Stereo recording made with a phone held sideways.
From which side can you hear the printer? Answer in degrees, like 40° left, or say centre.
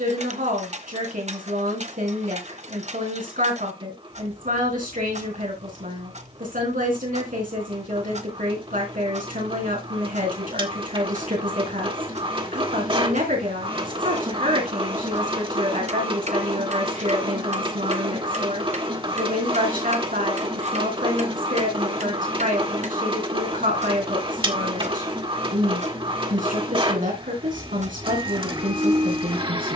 40° right.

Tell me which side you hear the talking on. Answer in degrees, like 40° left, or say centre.
70° right.